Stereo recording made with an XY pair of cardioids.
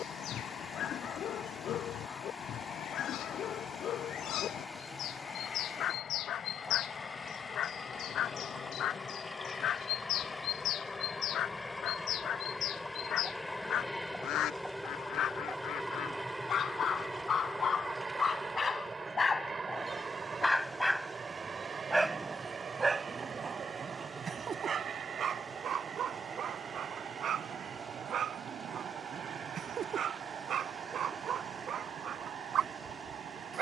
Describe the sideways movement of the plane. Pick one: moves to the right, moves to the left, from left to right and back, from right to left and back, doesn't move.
moves to the right.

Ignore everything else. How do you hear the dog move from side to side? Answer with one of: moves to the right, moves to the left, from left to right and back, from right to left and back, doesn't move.
moves to the right.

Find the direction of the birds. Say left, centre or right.
left.